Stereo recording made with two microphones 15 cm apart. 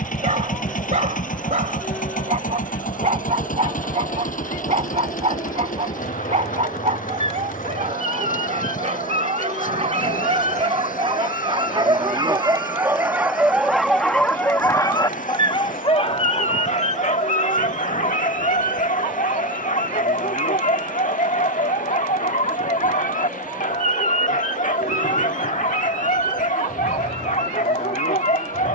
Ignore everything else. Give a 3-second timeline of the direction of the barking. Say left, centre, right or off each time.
right, right, right, right, centre, left, left, left, left, left.